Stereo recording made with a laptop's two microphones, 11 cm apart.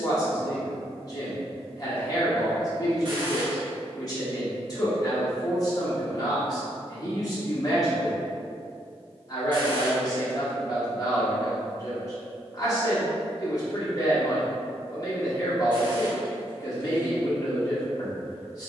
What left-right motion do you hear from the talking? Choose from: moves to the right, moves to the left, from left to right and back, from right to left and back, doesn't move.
doesn't move.